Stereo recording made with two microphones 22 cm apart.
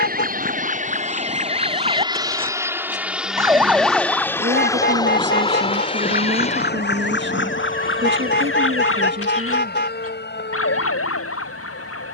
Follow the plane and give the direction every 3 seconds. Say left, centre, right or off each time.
right, centre, left, left.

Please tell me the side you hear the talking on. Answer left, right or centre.
right.